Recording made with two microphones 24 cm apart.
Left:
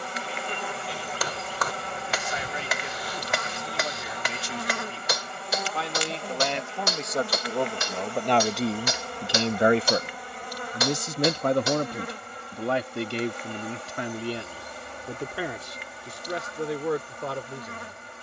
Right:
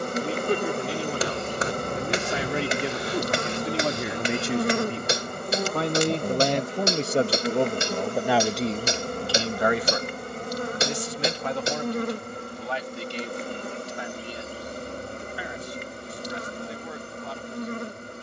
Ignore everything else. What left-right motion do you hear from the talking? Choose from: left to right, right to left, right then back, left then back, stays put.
right to left.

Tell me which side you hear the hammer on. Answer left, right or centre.
right.